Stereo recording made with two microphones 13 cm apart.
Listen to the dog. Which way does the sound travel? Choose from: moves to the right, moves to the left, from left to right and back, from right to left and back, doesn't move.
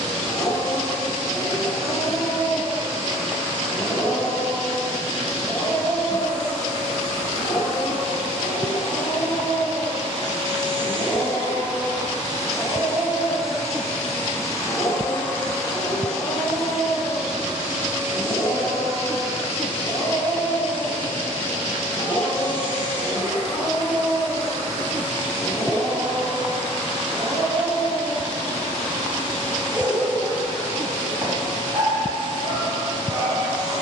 moves to the right.